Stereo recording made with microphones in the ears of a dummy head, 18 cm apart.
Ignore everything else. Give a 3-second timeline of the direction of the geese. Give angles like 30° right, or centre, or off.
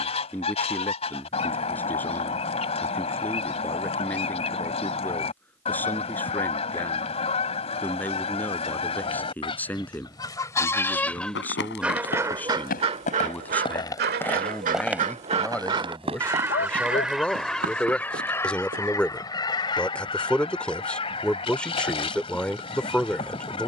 30° left, 30° left, 30° left, 20° left, 40° right, 10° right, 20° left, 30° left.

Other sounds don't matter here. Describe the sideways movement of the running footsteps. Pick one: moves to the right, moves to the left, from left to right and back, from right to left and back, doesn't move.
moves to the right.